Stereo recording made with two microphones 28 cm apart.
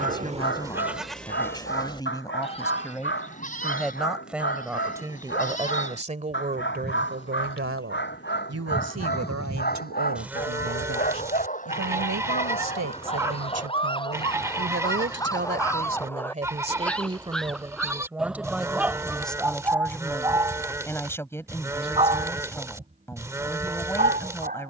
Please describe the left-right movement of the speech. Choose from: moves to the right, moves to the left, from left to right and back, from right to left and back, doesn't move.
from left to right and back.